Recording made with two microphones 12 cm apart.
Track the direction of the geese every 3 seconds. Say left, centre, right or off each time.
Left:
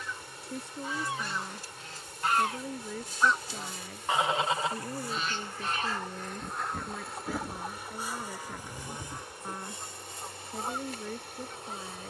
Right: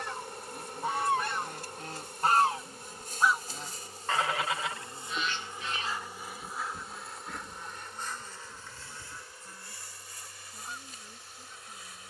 right, left, left, left.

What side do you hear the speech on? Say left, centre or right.
left.